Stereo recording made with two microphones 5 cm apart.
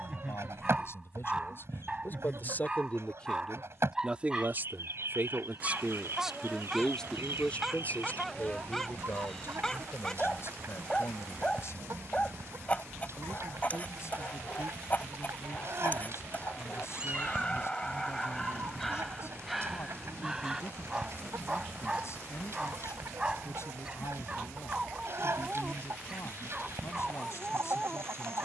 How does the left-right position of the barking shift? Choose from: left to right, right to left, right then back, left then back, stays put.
left then back.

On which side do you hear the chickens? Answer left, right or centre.
right.